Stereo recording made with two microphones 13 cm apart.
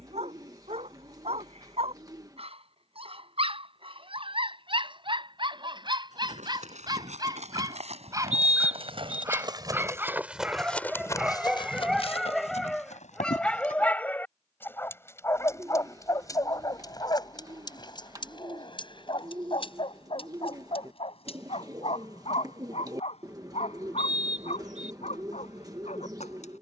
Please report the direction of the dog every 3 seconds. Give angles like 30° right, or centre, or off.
50° right, 40° right, 30° right, 10° right, 10° left, 30° left, 40° left, 50° left, 60° left.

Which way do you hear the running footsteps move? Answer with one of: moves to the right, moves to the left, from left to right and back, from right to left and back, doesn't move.
moves to the left.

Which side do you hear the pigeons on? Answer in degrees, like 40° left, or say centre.
30° right.